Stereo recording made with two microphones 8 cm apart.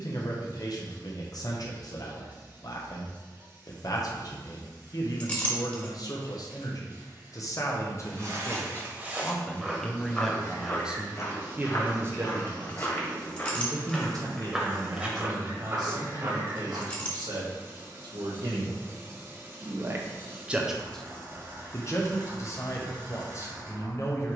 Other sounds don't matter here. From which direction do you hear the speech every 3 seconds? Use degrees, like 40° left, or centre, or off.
50° left, 50° left, 40° left, centre, 50° right, 60° right, 40° right, 40° left.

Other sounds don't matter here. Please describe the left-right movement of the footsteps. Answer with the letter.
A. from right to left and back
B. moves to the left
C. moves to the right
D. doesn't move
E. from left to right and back
A.